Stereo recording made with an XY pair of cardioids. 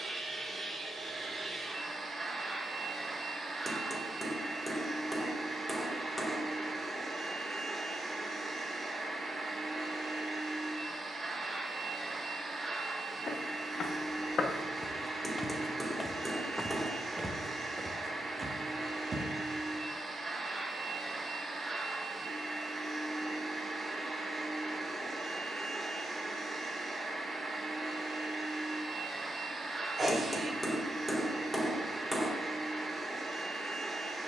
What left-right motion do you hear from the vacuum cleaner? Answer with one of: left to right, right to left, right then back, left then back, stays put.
stays put.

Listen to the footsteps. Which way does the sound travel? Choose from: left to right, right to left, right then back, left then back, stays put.
left to right.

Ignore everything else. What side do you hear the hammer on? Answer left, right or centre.
centre.